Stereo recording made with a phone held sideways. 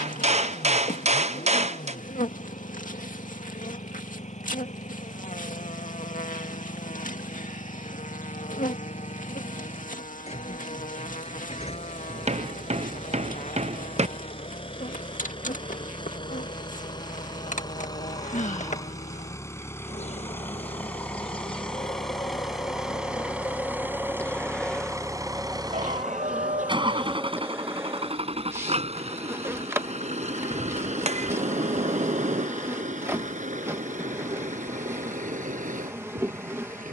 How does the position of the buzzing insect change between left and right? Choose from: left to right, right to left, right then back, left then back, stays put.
left to right.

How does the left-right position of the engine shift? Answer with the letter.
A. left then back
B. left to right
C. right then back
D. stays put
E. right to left
B.